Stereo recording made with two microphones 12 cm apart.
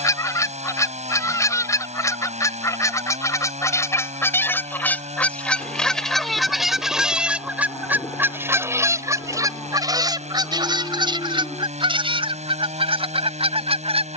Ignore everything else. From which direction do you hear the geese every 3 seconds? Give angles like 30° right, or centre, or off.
30° left, 20° left, 10° right, 40° right, 50° right.